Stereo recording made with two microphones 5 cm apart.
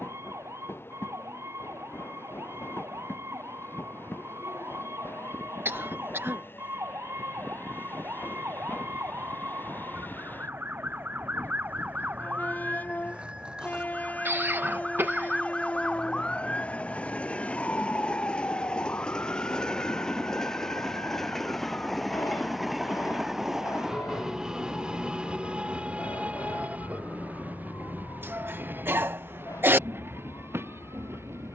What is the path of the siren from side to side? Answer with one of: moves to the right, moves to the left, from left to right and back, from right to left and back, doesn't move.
moves to the left.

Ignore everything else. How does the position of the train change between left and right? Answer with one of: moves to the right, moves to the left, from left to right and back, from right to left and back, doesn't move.
moves to the right.